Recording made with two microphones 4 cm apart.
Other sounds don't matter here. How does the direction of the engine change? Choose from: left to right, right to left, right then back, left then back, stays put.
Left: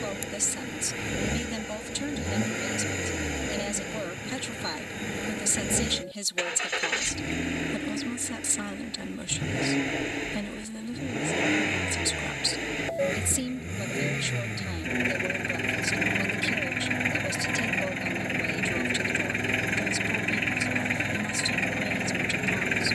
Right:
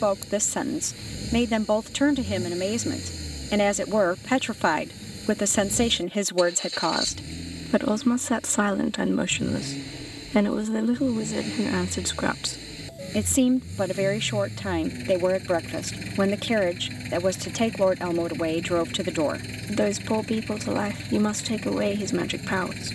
stays put.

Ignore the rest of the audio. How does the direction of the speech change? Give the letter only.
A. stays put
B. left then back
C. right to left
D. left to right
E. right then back
A.